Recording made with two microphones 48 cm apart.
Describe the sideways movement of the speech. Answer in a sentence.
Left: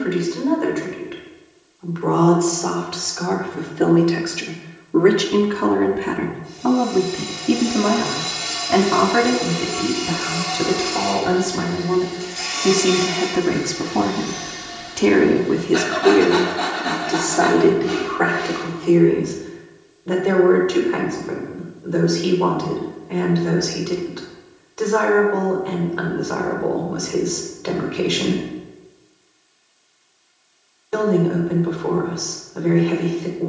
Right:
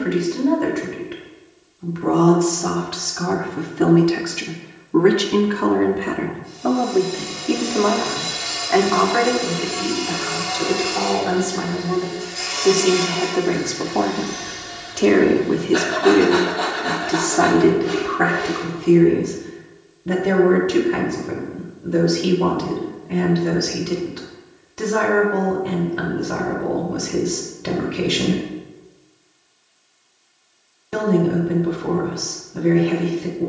In this clip you hear the speech go left and come back.